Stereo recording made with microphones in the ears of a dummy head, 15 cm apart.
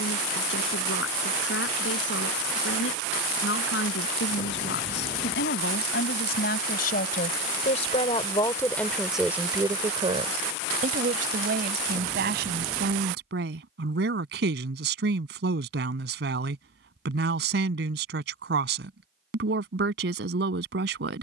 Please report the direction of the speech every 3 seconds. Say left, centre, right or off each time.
left, left, left, right, right, right, right.